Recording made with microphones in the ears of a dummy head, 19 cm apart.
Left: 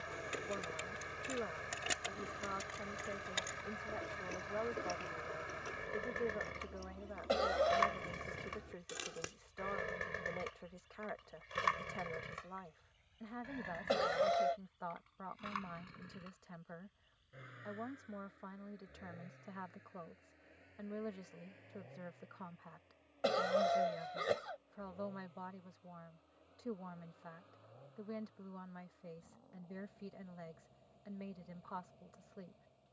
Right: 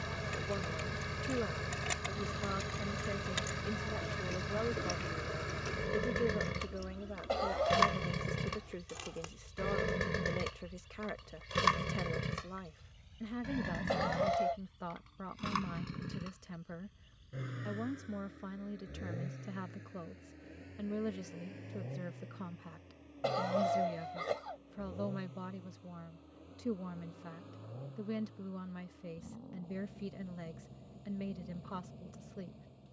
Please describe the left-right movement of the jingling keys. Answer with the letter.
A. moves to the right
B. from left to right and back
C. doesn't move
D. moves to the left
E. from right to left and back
B.